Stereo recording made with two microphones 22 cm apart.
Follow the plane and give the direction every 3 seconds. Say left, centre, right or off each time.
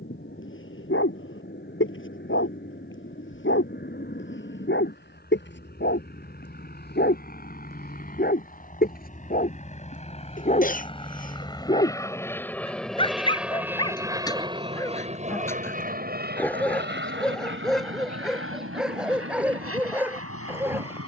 left, left, left, left, centre, right, right.